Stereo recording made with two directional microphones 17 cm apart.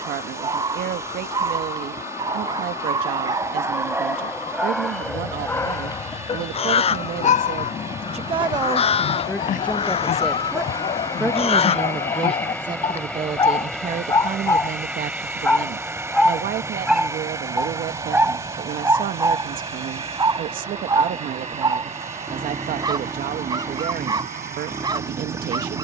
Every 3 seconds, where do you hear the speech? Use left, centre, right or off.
right, right, right, centre, right, right, right, right, right.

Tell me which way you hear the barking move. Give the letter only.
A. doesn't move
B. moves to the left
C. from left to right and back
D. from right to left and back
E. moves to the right
D.